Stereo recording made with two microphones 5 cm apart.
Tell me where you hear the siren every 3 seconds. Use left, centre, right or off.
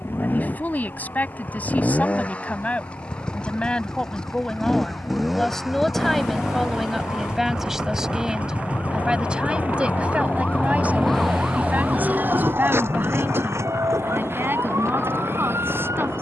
left, left, left, left, right, right.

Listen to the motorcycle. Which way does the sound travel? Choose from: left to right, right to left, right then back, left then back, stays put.
left to right.